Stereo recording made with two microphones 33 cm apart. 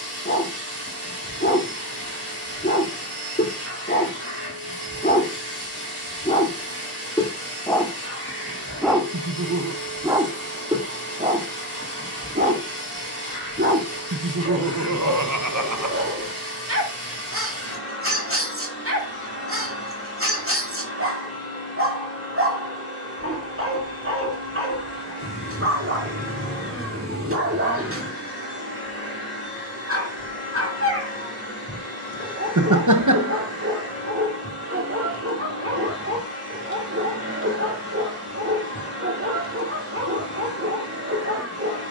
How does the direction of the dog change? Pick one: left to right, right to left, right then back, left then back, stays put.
left to right.